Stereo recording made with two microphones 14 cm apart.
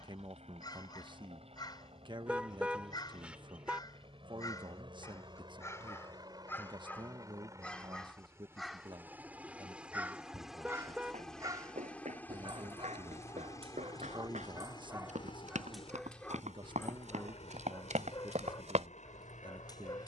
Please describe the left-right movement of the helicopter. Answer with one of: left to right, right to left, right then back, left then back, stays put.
right to left.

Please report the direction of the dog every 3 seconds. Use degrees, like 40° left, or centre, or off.
30° left, 20° left, 10° left, 20° right, 30° right, 10° left, 30° left.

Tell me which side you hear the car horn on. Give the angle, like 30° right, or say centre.
10° right.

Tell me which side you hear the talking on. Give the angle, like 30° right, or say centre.
30° right.